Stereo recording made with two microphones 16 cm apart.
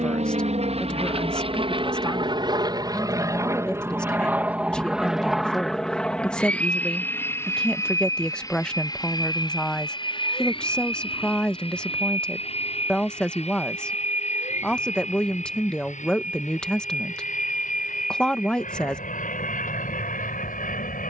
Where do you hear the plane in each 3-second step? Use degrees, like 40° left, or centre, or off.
40° right, 10° right, 10° left, 30° left, 40° left, 50° left, 50° left.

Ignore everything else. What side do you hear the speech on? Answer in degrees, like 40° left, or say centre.
10° left.